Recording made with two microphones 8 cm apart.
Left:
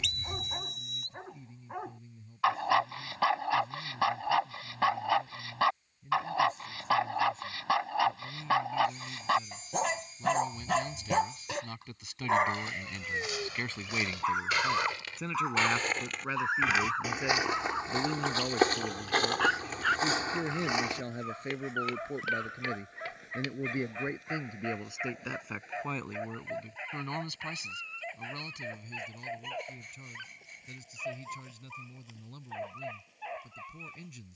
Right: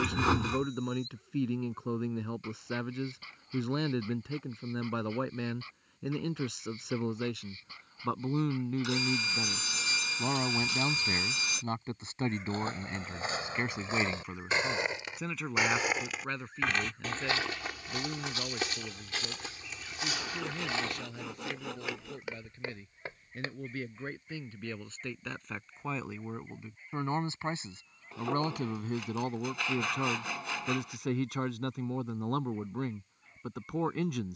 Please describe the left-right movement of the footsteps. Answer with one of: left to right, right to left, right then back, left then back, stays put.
left then back.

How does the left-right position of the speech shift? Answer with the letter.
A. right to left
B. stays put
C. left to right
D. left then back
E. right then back
D.